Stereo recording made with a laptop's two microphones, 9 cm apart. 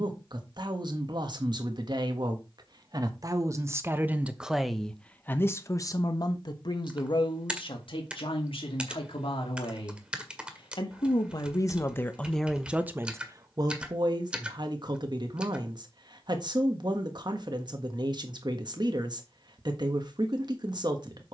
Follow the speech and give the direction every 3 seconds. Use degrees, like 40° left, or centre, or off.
50° right, 10° right, 60° left, 60° left, 30° right, 50° right, 50° right.